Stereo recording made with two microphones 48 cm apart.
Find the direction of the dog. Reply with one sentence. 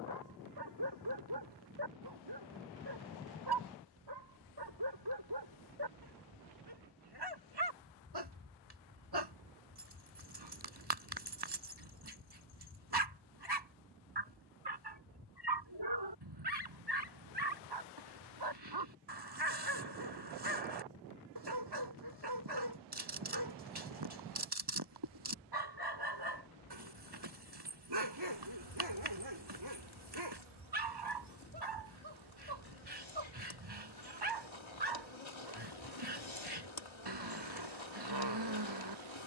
In this clip you hear the dog on the right.